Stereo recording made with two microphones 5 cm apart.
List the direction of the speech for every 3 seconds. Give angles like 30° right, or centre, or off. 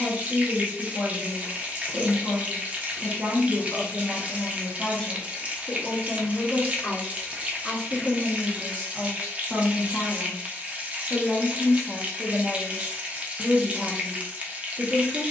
30° right, centre, 20° left, centre, 20° right.